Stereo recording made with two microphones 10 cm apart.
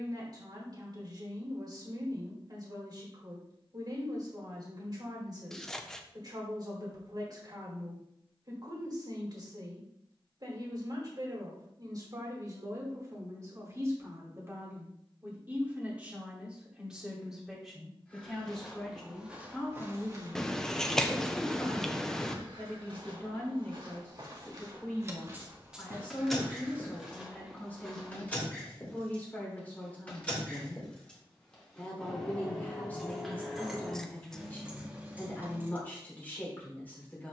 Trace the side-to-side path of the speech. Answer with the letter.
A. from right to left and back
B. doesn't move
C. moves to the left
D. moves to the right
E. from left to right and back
C.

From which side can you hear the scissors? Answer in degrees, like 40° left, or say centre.
10° left.